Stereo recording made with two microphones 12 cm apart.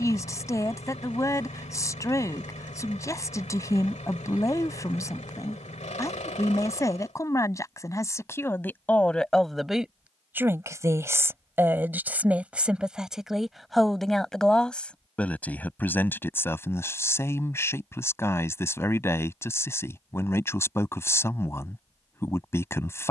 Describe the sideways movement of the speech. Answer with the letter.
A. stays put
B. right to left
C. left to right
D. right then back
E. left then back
D.